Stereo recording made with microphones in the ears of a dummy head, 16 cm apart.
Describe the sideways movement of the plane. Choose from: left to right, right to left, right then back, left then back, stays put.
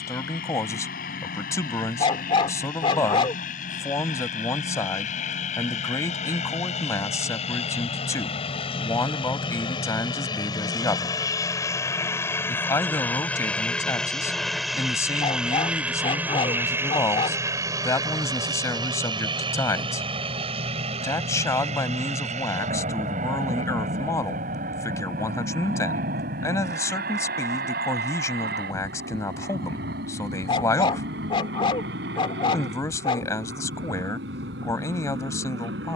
left to right.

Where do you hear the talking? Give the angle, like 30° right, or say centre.
20° left.